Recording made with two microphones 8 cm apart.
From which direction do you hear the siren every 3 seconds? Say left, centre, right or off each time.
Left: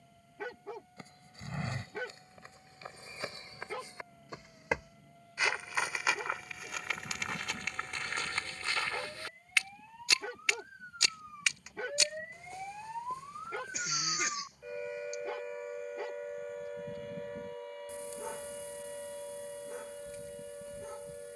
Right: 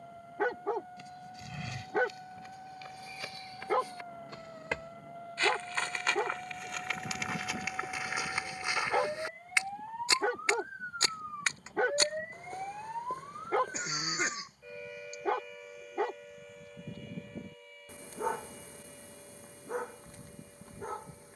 right, right, right, right, centre, left, left.